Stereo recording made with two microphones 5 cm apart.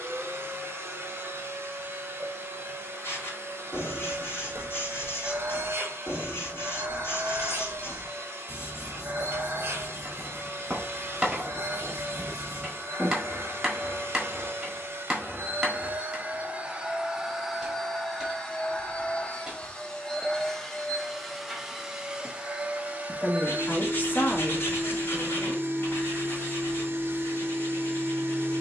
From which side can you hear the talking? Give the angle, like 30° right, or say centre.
40° left.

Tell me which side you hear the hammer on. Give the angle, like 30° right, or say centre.
10° right.